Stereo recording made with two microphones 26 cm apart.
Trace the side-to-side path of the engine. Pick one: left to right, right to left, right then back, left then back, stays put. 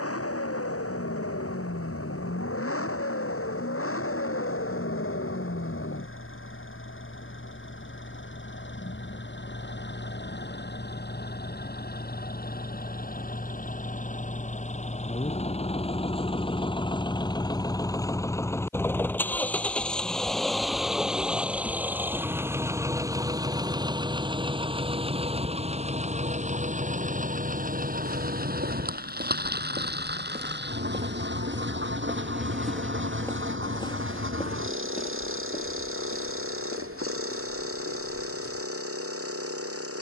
left to right.